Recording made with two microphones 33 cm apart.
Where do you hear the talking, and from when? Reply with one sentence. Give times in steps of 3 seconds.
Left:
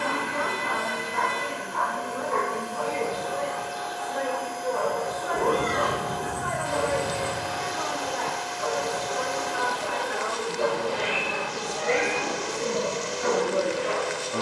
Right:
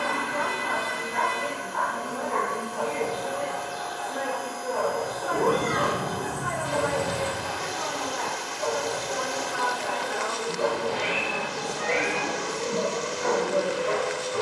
You can hear the talking on the left from 0 s, on the right from 3 s, in the centre from 9 s and on the left from 12 s.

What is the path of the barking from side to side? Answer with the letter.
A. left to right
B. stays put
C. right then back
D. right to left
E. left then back
A.